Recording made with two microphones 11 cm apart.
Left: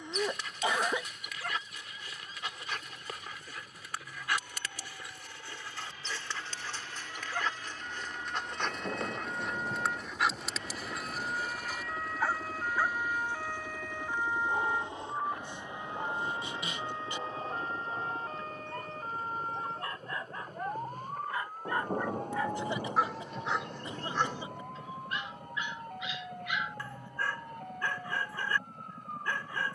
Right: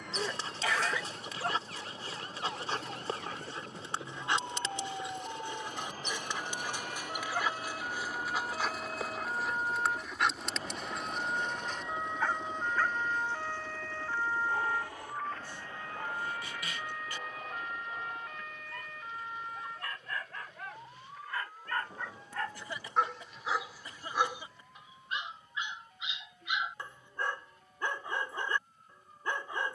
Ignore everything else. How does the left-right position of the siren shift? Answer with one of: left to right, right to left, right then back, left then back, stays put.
right to left.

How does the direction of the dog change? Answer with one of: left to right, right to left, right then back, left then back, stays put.
left then back.